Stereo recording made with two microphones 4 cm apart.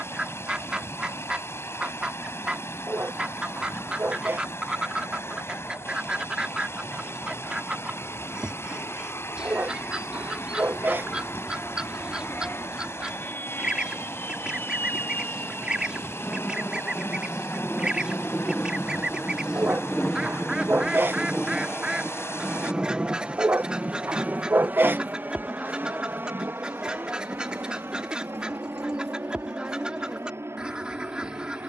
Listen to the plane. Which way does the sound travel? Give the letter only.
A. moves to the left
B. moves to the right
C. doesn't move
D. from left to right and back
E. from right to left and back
B.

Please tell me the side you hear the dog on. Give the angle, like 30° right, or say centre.
50° right.